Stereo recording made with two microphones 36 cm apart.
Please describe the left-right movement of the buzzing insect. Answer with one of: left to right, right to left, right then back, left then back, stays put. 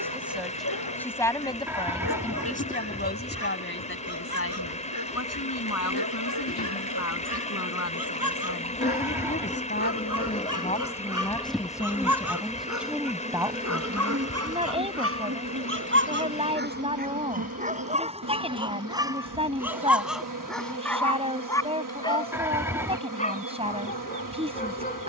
left to right.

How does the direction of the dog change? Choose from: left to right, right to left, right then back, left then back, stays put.
right to left.